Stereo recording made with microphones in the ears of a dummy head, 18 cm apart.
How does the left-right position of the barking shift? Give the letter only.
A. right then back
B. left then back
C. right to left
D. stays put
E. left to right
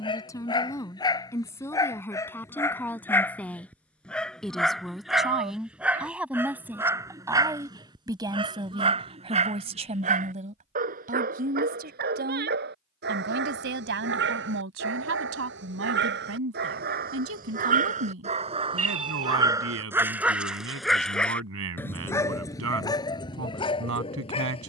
A.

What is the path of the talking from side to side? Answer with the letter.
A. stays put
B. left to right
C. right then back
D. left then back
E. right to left
B.